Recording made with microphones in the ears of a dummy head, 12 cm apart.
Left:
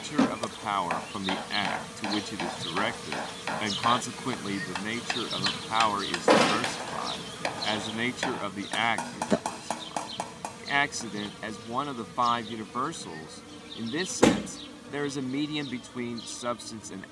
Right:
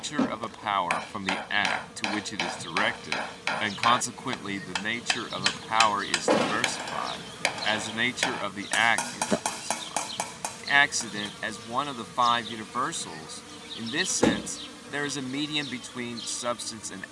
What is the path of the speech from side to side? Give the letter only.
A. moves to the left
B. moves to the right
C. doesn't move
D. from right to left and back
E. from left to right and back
C.